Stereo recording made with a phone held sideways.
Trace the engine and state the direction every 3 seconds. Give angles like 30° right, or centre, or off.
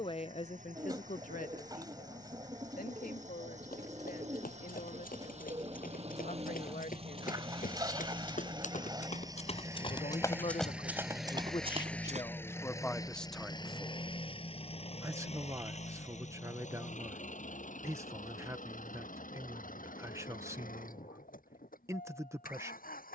60° right, 50° right, 40° right, 10° right, 30° left, 60° left, 70° left, 80° left.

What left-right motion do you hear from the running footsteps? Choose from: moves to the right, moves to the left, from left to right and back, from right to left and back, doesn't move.
moves to the right.